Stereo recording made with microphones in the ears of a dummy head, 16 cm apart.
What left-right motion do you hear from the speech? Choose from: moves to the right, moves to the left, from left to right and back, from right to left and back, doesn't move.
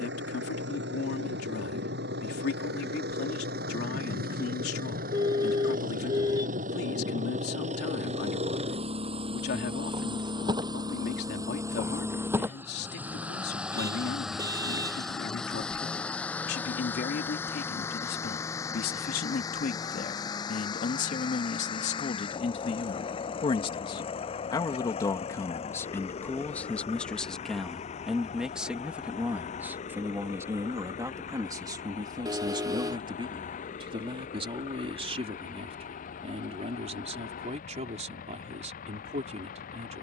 moves to the right.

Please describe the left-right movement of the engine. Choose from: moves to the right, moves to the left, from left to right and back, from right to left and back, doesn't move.
moves to the left.